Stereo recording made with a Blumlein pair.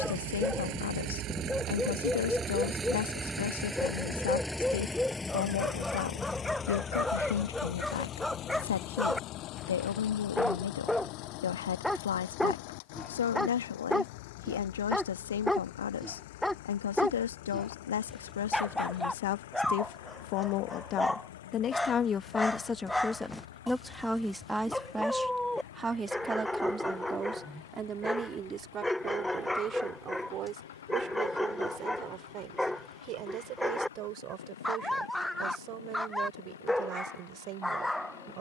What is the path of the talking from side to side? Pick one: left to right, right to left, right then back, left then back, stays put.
left to right.